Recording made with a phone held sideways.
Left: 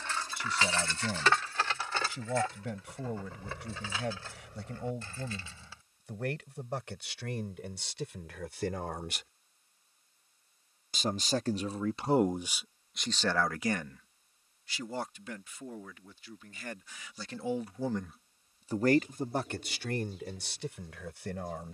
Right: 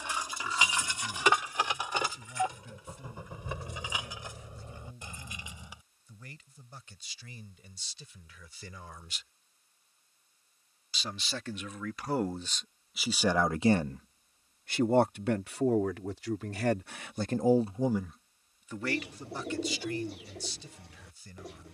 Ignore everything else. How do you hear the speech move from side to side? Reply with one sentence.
You can hear the speech move from left to right and back again.